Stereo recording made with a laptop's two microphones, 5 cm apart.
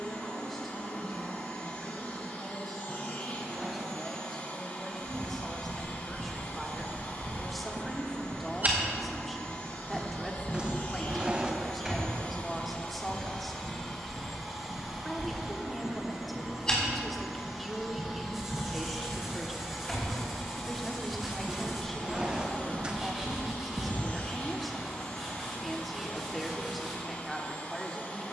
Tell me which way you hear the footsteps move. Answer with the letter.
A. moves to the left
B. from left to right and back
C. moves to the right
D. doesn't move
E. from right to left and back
E.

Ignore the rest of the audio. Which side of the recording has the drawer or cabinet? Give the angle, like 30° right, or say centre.
20° right.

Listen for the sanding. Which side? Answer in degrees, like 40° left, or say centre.
10° right.